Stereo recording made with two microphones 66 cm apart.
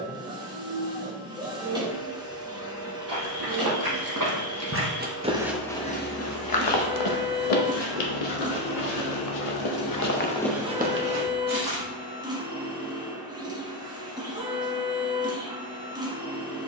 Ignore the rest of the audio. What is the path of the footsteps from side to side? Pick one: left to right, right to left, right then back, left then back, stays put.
left then back.